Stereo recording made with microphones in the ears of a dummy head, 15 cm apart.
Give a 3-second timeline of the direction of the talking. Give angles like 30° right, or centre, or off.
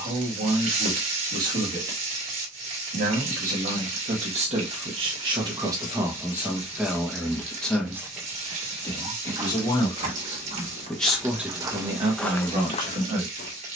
50° right, 40° right, centre, 10° left, 50° right.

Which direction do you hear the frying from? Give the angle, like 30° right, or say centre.
50° right.